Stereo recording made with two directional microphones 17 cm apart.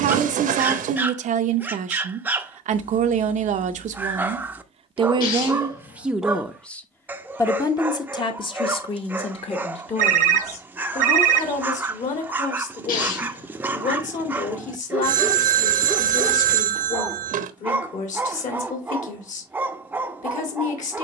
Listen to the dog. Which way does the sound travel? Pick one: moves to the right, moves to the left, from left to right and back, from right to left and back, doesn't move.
doesn't move.